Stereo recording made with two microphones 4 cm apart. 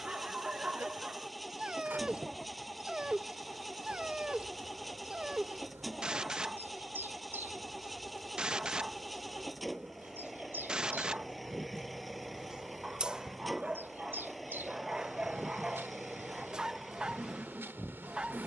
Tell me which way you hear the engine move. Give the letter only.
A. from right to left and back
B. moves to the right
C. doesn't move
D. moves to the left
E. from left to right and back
C.